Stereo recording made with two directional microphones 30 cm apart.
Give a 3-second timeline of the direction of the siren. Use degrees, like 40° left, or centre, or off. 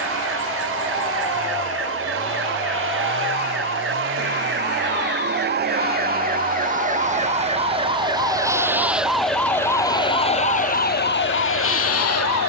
50° right, 40° right, 20° right, 20° left.